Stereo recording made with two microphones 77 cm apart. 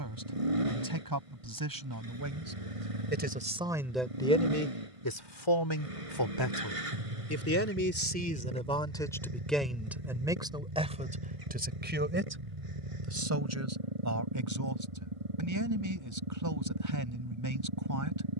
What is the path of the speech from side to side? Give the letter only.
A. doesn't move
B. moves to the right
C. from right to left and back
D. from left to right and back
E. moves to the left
C.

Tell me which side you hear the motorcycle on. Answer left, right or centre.
right.